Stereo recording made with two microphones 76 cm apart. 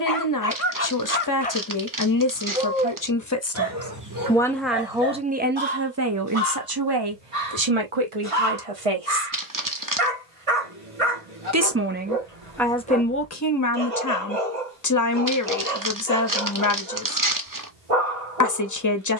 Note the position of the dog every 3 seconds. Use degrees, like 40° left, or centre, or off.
10° left, 30° right, 50° right, 50° right, 50° right, 50° right, 50° right.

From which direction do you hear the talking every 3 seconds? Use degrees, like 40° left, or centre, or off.
30° left, centre, 40° right, 30° right, 20° left, 30° left, 30° left.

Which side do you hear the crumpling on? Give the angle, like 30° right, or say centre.
30° right.